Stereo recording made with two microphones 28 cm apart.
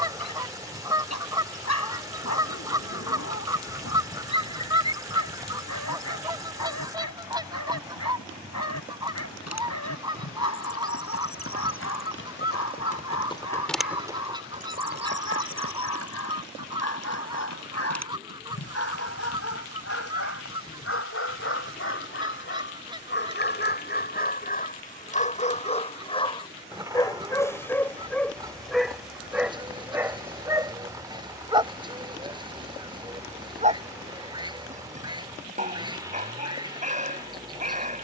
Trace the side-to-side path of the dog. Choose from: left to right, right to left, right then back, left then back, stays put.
left to right.